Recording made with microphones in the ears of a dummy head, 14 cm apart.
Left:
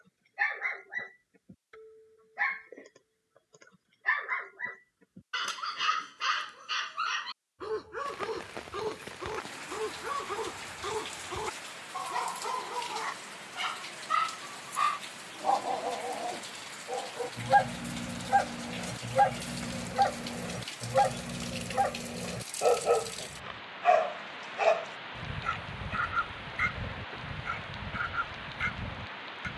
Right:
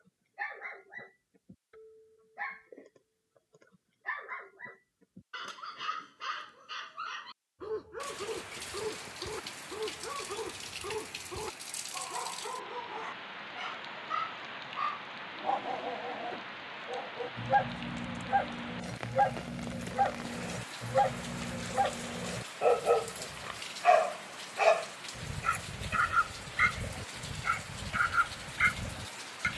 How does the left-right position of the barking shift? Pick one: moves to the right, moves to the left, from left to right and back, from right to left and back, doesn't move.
moves to the right.